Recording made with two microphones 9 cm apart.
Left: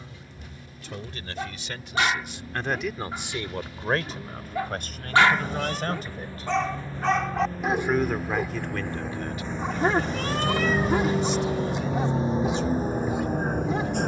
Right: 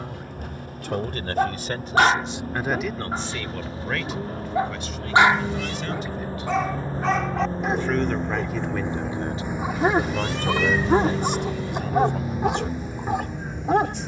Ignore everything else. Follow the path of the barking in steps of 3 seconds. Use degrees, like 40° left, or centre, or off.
60° right, 30° right, centre, 30° right, 70° right.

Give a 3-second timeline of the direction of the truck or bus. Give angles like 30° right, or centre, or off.
60° right, 50° right, 30° right, centre, 40° left.